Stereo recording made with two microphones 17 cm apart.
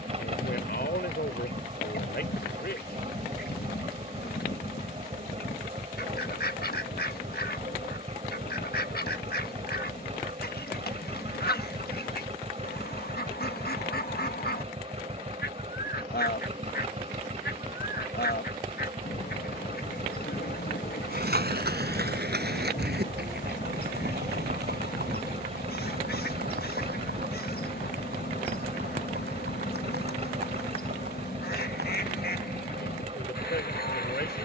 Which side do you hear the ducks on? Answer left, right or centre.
left.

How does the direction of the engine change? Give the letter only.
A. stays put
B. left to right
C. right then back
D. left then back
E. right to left
A.